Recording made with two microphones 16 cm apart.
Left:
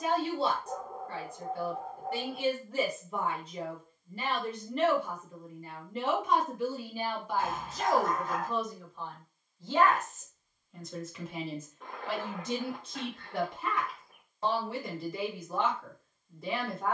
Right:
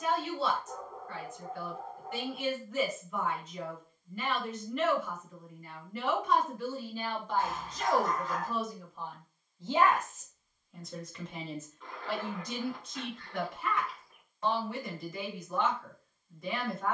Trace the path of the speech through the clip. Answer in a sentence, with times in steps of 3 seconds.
In this clip you hear the speech on the left from 0 s, in the centre from 6 s and on the left from 12 s.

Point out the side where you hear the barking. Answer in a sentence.
In this clip you hear the barking on the left.